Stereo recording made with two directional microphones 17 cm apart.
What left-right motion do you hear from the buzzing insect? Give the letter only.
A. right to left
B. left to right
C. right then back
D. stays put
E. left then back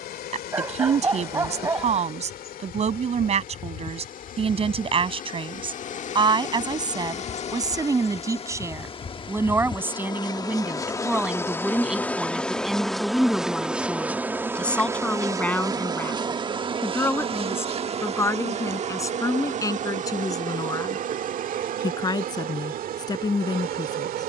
B.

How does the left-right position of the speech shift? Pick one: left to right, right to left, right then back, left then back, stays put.
right to left.